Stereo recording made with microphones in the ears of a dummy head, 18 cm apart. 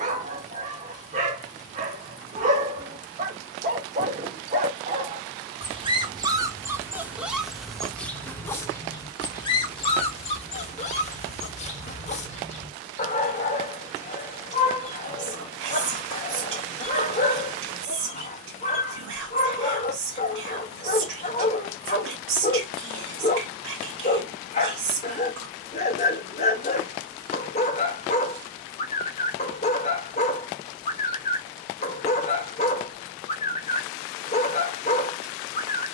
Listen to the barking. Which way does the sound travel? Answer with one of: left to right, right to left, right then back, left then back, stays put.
right to left.